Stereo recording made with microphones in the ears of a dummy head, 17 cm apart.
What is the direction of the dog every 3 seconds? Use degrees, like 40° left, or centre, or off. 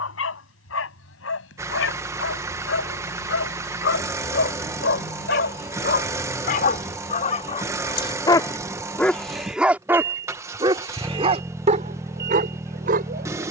80° left, 60° left, 40° left, 20° right, 50° right.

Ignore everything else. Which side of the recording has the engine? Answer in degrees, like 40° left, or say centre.
10° right.